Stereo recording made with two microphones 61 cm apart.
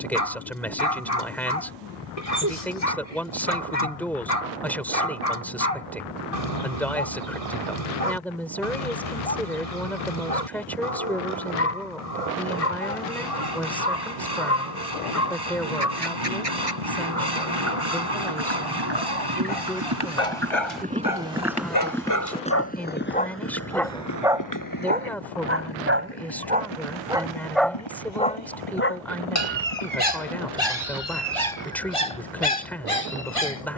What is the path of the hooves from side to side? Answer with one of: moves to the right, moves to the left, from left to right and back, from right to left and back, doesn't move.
moves to the left.